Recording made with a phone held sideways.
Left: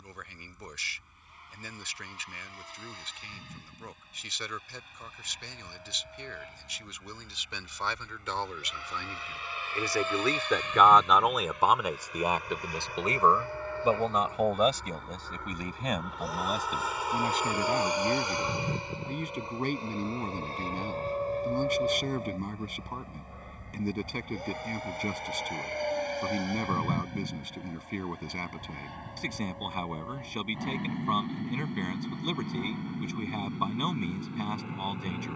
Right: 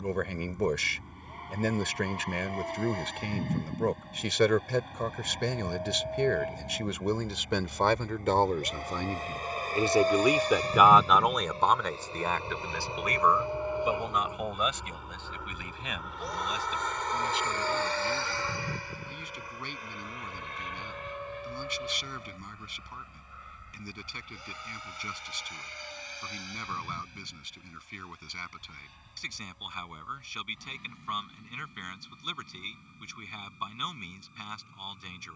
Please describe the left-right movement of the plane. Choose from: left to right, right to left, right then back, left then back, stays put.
right to left.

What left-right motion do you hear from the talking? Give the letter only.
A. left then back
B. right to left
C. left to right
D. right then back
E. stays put
B.